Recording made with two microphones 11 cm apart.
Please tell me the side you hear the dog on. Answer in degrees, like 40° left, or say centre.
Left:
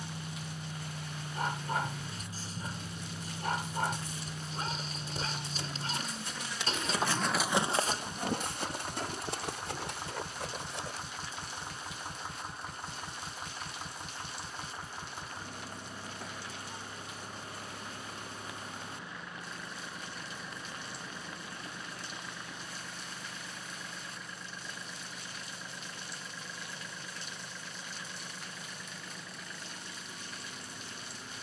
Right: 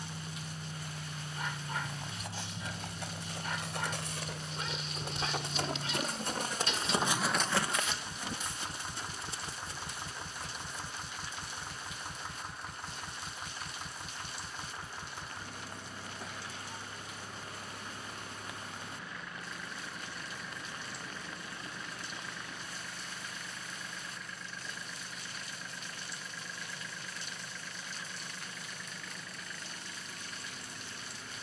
40° left.